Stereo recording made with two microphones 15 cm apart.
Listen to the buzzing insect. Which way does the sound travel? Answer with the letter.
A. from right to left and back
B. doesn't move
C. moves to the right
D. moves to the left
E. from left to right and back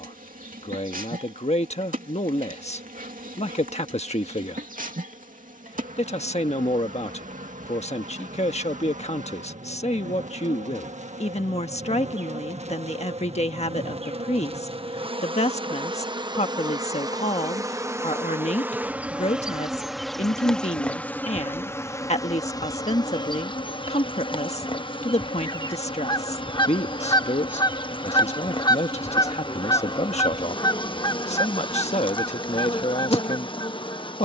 D.